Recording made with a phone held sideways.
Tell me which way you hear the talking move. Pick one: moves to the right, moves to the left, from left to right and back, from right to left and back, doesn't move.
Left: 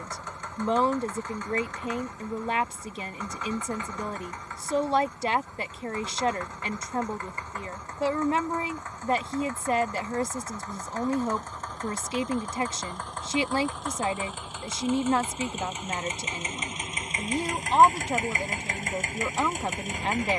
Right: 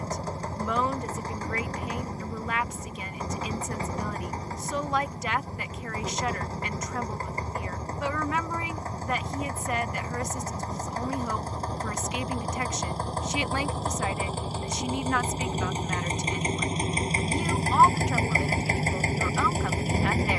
doesn't move.